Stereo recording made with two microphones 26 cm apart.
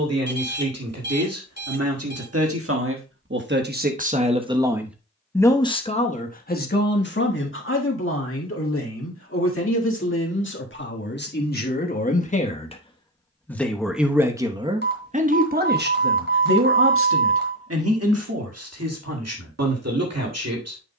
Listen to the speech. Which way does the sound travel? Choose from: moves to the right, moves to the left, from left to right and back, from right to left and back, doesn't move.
from right to left and back.